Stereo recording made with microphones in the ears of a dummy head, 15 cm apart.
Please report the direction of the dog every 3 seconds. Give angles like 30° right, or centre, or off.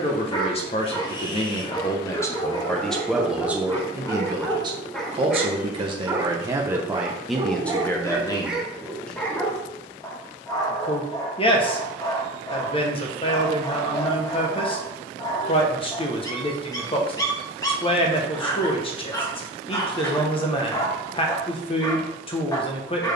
30° left, 10° left, 10° right, 20° left, 20° left, 20° left, 20° left, 20° left.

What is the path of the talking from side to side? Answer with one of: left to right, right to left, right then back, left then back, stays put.
right then back.